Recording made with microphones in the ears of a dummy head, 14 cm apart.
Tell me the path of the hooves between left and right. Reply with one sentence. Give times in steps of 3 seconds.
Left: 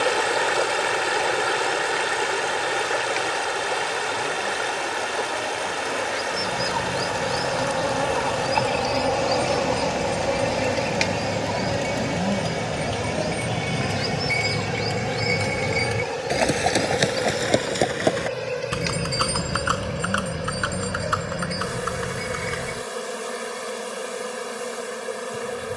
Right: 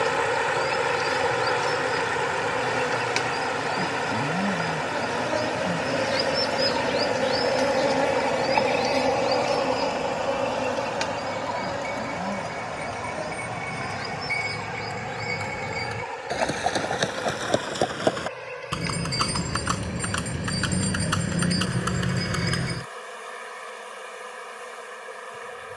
In this clip you hear the hooves not at all from 0 s, on the left from 6 s, in the centre from 18 s, on the right from 21 s and not at all from 24 s.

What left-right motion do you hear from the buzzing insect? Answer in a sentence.
In this clip you hear the buzzing insect travel towards the left.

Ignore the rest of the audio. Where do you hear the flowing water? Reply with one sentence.
You can hear the flowing water on the left.